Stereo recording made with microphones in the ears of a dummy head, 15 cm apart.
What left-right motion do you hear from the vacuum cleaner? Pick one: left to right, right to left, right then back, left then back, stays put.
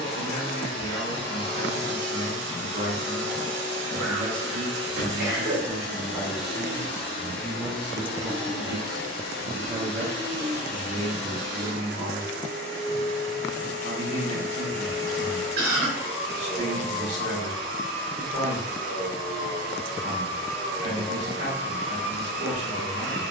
stays put.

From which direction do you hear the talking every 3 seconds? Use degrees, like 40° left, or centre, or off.
50° right, 30° right, centre, 40° right, 50° right, 50° right, 50° right, 50° right.